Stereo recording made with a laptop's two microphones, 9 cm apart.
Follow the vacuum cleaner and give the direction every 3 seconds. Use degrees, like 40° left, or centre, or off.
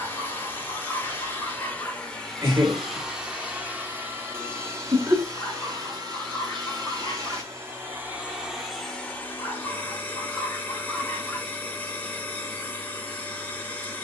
10° left, 30° right, 30° right, 20° left, 20° left.